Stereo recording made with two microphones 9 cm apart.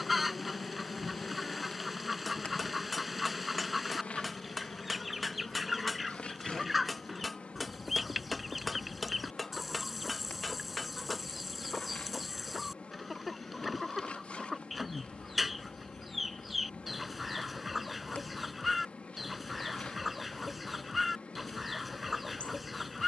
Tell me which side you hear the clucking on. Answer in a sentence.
In this clip you hear the clucking in the centre.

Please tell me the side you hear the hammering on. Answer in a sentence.
You can hear the hammering in the centre.